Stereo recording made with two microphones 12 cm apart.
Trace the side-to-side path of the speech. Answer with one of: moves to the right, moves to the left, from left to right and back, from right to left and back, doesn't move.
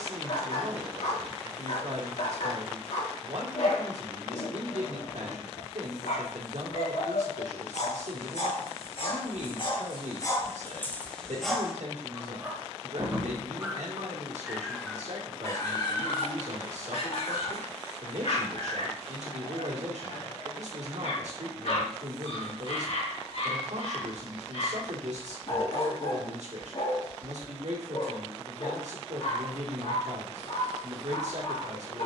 doesn't move.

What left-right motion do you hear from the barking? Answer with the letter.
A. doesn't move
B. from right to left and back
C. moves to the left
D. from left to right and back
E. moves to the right
D.